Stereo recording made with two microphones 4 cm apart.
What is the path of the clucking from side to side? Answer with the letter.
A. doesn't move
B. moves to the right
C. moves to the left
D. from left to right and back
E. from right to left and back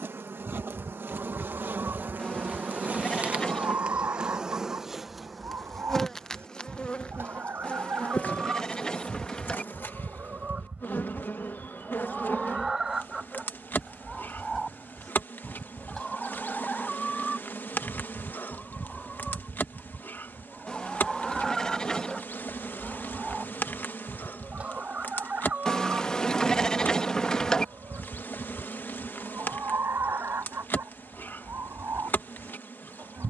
E.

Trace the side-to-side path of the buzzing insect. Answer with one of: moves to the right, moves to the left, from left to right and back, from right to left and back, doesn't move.
moves to the left.